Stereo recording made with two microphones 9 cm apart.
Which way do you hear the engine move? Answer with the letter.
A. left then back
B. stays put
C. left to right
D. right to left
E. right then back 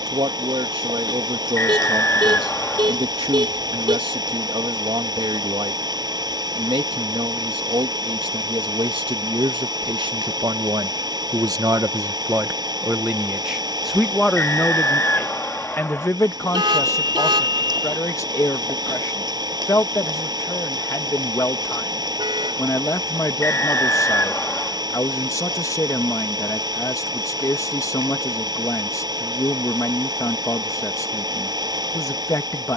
B.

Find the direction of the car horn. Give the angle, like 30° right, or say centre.
70° right.